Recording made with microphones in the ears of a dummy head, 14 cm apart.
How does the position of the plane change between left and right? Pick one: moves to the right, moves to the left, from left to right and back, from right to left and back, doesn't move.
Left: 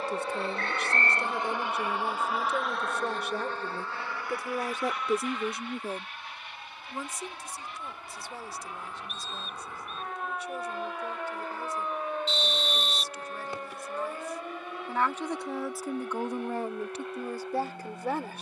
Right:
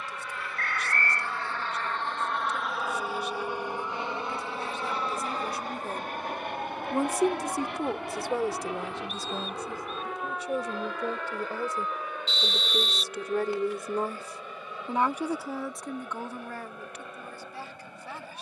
moves to the right.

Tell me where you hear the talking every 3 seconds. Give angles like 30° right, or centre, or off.
50° left, 40° left, 40° right, 70° right, 40° right, 20° left.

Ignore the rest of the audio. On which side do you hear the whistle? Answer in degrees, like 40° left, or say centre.
90° left.